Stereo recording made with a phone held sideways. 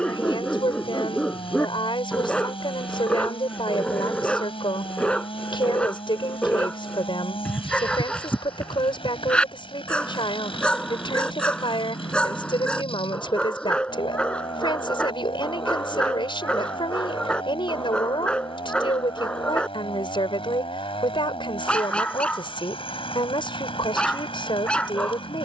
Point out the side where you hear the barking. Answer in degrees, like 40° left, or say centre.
10° left.